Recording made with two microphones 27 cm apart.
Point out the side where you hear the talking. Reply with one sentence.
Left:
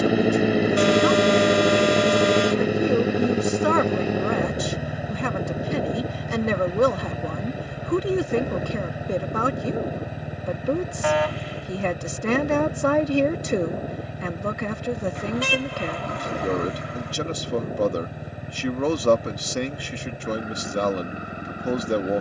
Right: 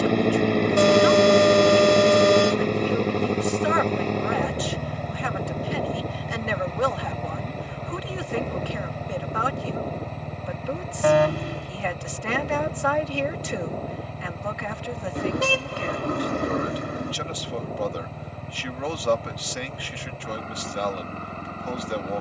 In this clip you hear the talking on the left.